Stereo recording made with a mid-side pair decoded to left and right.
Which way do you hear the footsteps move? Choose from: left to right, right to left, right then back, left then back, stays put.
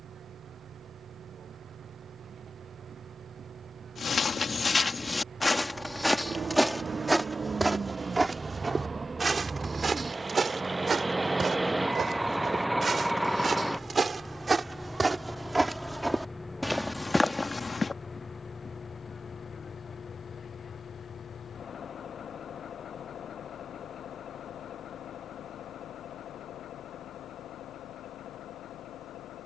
right then back.